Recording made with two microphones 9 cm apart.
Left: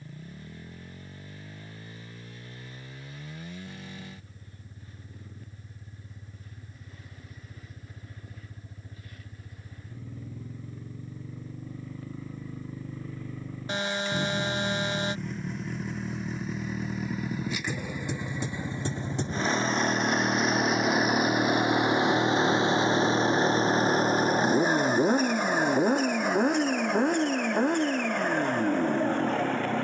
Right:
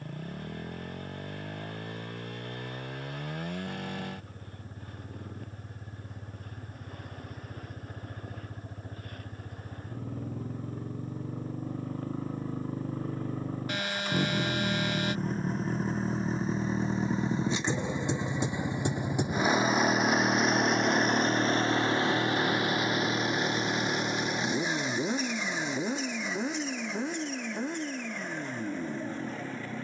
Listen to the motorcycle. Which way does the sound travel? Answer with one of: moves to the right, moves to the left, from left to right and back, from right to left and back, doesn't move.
moves to the left.